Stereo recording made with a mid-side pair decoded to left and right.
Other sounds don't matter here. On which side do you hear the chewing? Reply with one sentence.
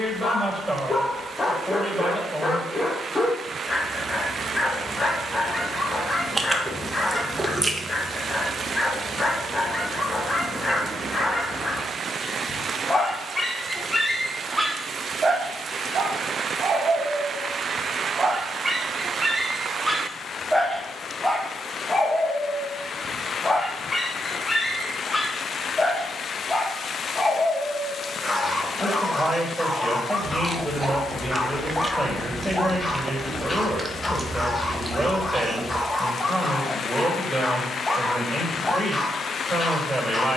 You can hear the chewing on the right.